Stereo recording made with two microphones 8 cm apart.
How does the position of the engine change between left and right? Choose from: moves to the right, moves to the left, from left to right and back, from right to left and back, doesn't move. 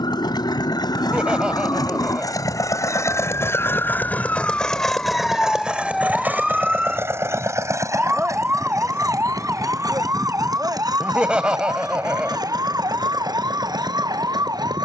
moves to the right.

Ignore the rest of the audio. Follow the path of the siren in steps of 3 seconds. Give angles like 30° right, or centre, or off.
50° left, 20° left, 10° right, 40° right, 50° right.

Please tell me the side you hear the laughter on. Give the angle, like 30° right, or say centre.
10° right.